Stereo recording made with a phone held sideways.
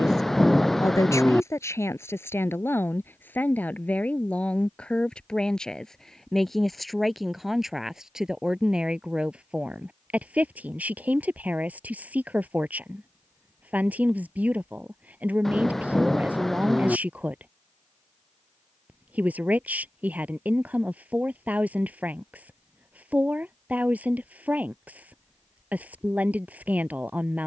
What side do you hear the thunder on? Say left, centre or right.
centre.